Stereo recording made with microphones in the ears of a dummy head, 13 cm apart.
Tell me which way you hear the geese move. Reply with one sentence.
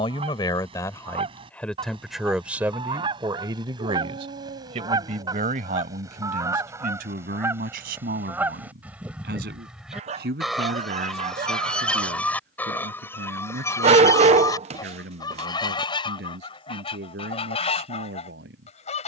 In this clip you hear the geese travel towards the left.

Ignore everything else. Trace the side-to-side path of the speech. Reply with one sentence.
You can hear the speech move to the right.